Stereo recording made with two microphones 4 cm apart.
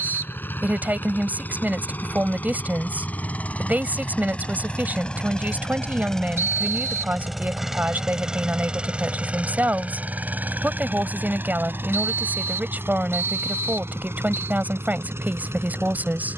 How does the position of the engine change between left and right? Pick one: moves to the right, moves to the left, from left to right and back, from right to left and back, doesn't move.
moves to the right.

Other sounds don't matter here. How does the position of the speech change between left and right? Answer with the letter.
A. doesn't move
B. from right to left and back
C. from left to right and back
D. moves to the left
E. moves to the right
A.